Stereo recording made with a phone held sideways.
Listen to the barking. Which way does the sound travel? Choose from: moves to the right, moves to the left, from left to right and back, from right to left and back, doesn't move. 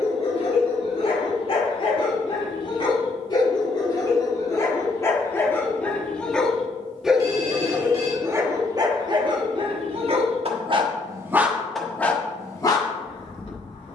from left to right and back.